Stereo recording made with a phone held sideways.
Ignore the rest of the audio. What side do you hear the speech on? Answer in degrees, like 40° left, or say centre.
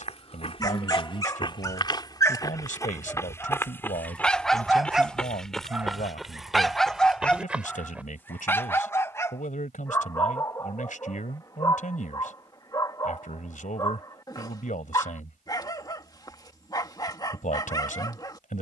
70° left.